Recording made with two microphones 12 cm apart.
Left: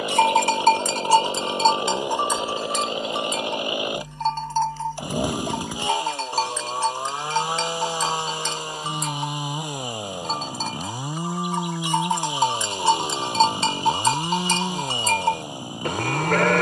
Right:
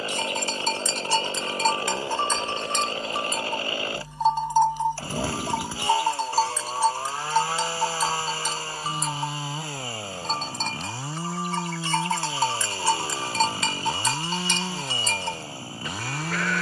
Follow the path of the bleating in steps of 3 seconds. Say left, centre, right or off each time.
left, centre, centre, centre, left, left.